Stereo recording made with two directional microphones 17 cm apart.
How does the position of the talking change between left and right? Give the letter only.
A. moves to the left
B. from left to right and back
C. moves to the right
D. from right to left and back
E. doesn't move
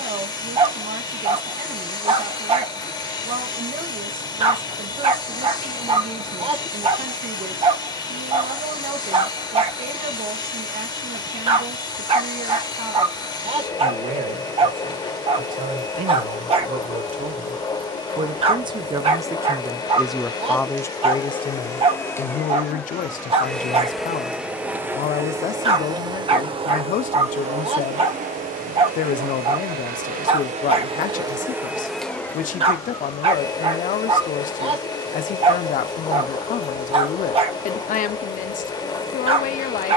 A.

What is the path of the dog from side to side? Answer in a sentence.
In this clip you hear the dog stay in one place.